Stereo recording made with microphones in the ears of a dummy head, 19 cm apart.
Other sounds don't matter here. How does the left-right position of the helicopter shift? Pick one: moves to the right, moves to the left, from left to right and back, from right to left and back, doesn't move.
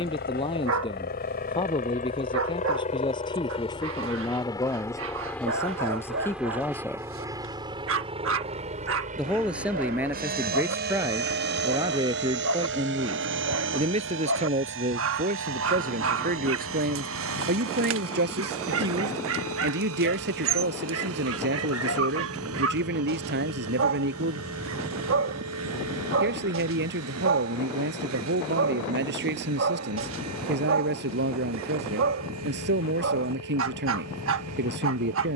moves to the right.